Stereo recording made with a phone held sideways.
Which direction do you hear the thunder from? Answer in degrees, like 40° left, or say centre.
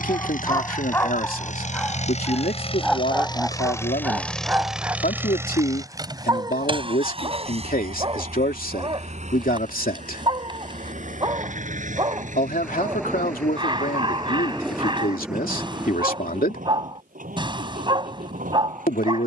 10° right.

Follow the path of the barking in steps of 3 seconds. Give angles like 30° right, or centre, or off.
20° left, 10° right, 30° right, 30° right, 30° right, 30° right, 30° right.